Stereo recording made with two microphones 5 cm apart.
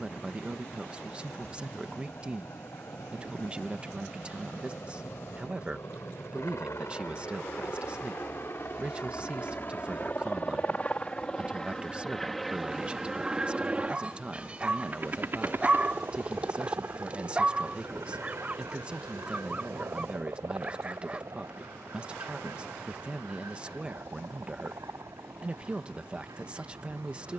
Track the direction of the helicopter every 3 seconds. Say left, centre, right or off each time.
left, left, left, left, centre, right, right, right, right.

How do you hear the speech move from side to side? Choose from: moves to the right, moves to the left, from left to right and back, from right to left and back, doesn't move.
doesn't move.